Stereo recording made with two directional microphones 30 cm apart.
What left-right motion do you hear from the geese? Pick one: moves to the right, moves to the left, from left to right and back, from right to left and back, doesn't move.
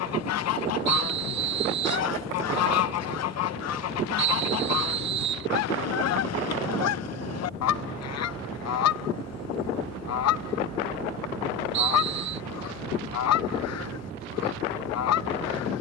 doesn't move.